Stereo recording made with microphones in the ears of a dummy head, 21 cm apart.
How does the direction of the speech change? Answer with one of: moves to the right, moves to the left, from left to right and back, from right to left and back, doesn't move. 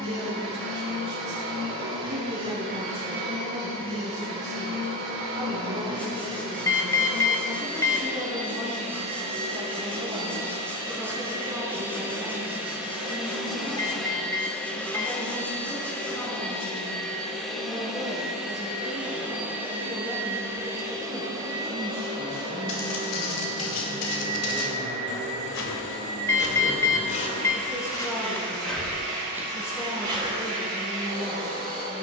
moves to the left.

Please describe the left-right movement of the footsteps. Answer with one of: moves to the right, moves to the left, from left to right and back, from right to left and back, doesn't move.
moves to the right.